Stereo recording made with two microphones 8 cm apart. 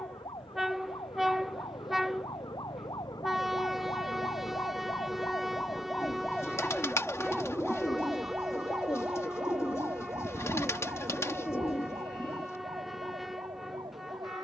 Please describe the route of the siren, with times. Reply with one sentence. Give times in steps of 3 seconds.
You can hear the siren on the left from 0 s, in the centre from 6 s and on the right from 9 s.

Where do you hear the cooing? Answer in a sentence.
In this clip you hear the cooing on the left.